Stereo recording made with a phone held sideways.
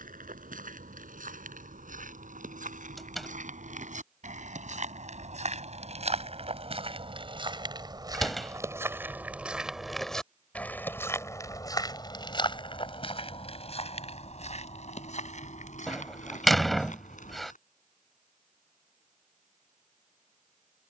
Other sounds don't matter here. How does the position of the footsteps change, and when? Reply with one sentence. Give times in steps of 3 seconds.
In this clip you hear the footsteps on the right from 0 s, in the centre from 9 s, on the left from 12 s and not at all from 18 s.